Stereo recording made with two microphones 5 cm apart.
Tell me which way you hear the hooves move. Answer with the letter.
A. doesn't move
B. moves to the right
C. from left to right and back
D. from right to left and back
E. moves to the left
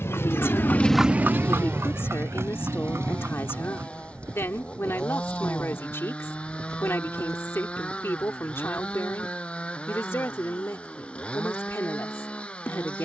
B.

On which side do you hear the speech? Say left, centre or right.
left.